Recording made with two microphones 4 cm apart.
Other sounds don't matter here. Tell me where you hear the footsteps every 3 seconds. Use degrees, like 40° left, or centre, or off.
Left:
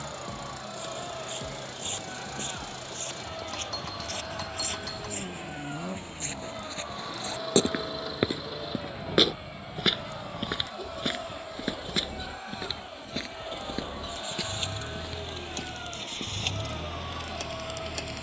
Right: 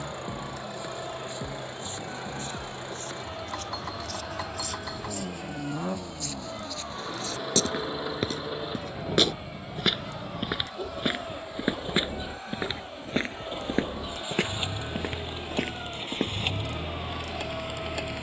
60° left, 50° left, 30° left, 10° right, 40° right, 50° right.